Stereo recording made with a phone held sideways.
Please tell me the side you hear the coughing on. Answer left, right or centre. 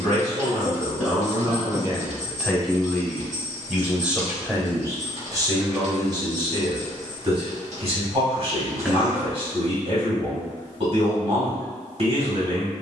centre.